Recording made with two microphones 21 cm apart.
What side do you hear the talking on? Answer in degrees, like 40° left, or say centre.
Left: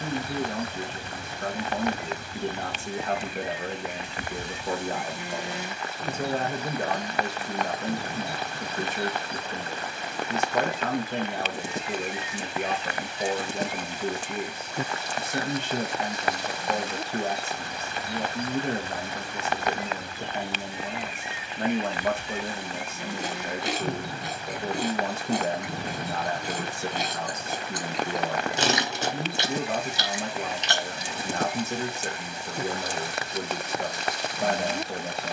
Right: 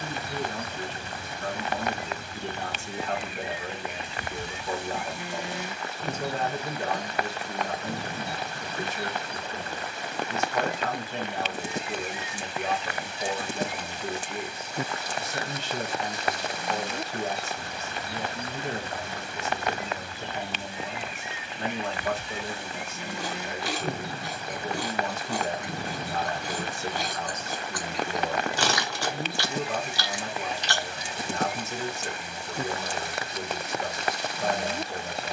50° left.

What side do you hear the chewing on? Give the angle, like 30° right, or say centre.
20° left.